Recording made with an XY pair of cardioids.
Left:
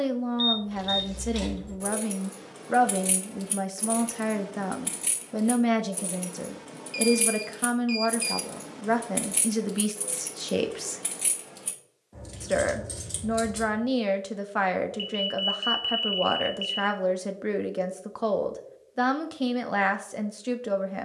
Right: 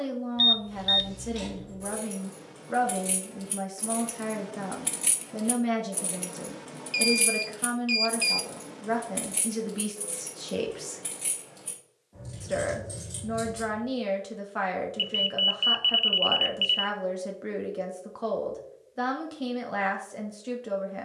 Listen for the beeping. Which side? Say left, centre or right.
right.